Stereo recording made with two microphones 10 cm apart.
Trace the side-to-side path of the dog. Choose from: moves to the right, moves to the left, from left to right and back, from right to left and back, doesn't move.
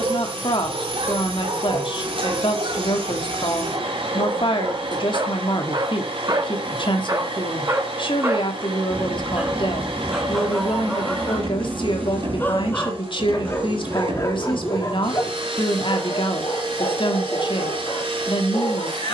moves to the left.